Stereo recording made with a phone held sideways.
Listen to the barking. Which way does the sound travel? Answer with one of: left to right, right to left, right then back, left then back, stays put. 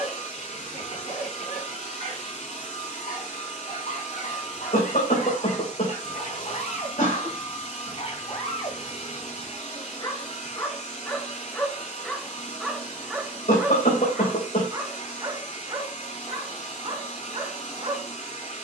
left to right.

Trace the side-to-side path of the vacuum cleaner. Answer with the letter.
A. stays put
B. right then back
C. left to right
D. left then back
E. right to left
A.